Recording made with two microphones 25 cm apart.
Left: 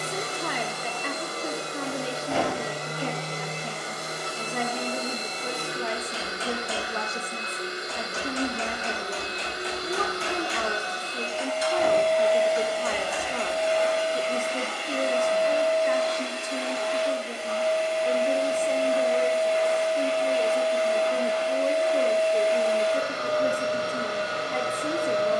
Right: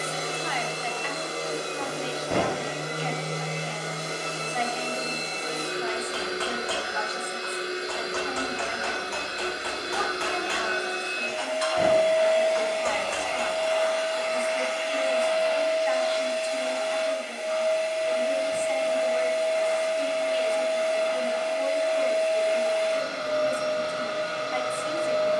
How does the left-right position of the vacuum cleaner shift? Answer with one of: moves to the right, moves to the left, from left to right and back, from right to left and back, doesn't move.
moves to the left.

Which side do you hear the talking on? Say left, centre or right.
left.